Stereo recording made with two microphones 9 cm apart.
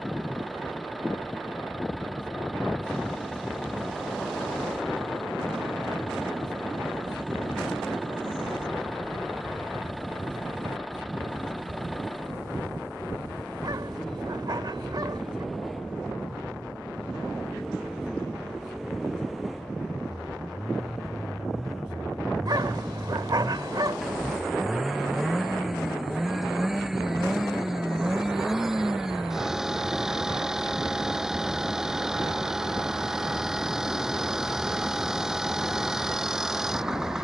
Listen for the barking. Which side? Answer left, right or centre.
right.